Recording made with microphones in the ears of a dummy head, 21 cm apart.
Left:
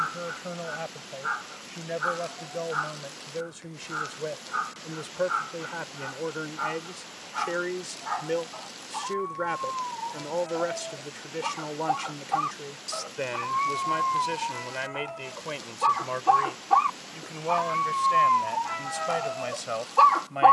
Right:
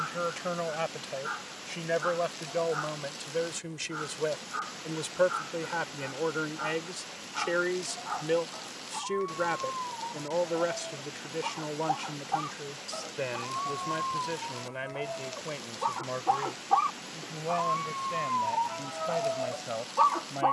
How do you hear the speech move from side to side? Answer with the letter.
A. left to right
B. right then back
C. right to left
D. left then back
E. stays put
C.